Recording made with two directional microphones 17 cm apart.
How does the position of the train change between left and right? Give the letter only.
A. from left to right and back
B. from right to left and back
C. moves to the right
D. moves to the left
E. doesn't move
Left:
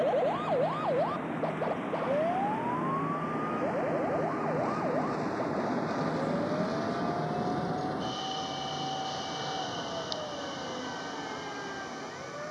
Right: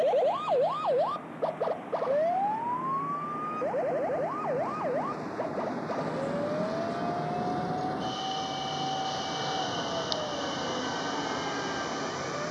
C.